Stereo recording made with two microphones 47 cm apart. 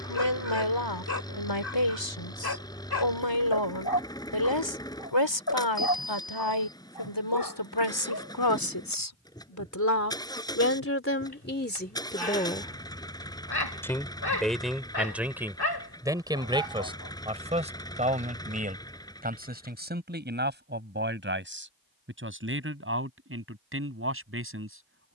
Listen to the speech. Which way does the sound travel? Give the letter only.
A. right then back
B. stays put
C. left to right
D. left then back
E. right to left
C.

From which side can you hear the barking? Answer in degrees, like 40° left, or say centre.
50° left.